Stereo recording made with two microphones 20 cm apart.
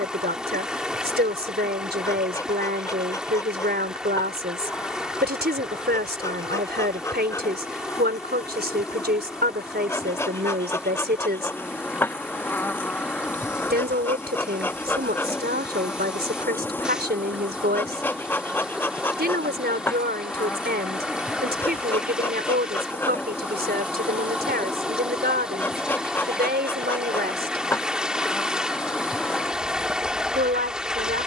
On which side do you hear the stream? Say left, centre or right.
centre.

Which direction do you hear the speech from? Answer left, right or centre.
right.